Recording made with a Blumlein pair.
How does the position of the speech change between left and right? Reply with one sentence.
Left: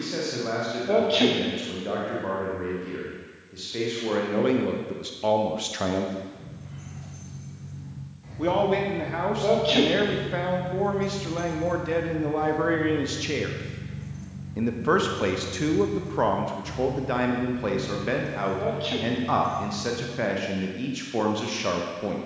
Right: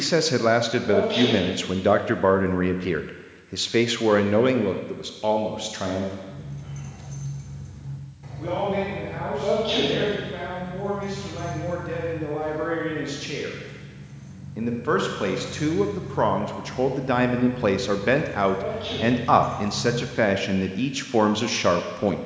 You can hear the speech go left and come back.